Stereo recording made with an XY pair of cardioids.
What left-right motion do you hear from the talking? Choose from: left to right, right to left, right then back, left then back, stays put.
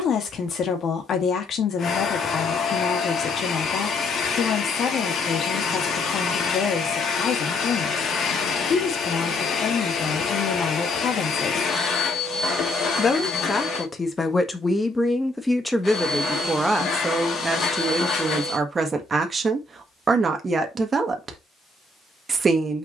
left to right.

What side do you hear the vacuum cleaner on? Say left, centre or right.
left.